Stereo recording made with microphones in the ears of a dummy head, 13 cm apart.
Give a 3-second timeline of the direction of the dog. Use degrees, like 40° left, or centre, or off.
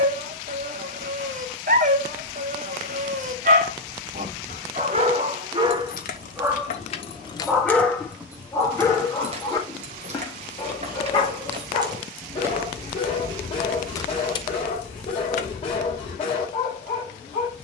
60° right, 50° right, centre, 40° left, 50° left, 50° left.